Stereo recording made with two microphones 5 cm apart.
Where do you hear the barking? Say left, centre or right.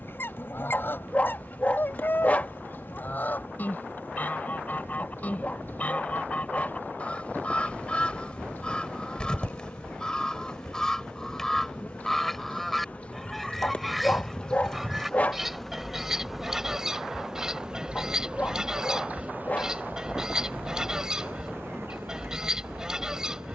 left.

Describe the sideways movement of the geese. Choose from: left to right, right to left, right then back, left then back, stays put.
left to right.